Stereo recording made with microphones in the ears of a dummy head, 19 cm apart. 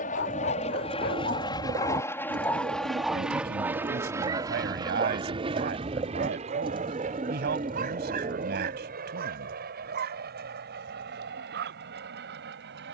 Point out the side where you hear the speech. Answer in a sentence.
In this clip you hear the speech on the right.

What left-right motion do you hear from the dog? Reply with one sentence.
You can hear the dog travel towards the right.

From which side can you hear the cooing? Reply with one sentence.
You can hear the cooing on the right.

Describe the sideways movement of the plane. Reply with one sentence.
In this clip you hear the plane go from the left side to the right.